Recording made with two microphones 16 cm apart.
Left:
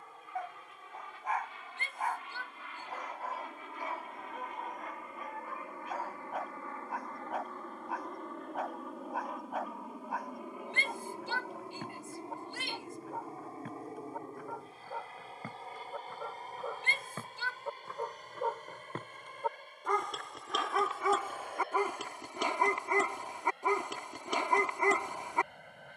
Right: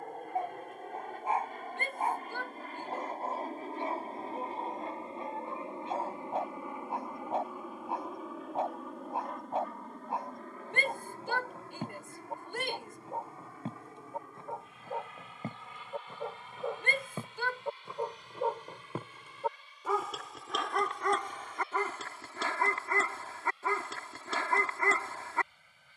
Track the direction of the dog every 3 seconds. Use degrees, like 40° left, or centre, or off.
30° right, 30° right, 30° right, 30° right, 30° right, 20° right, 10° right, 10° left, 20° left.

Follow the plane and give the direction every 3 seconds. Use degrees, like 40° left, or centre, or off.
50° right, 30° right, 10° right, 10° left, 30° left, 40° left, 50° left, 50° left, 60° left.